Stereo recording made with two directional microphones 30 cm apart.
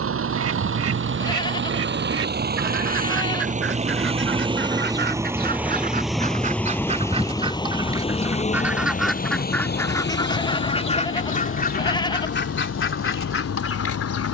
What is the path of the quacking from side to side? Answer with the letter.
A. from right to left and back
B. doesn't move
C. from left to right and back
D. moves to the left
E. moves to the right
D.